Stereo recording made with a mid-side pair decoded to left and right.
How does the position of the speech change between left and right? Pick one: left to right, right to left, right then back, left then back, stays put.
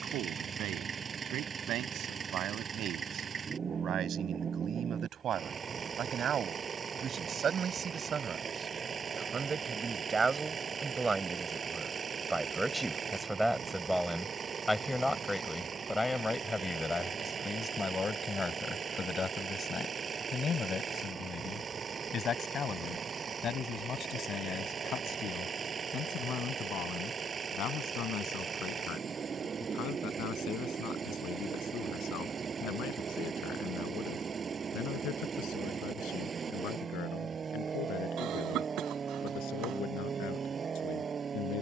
right to left.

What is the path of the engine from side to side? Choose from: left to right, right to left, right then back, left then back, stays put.
stays put.